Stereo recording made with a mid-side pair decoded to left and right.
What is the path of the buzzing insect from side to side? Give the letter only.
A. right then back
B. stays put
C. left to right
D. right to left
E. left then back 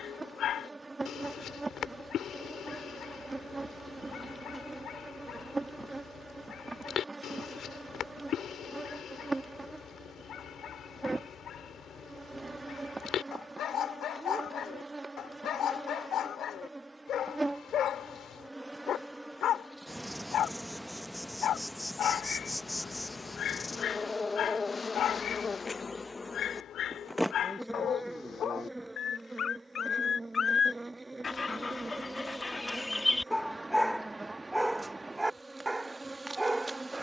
E.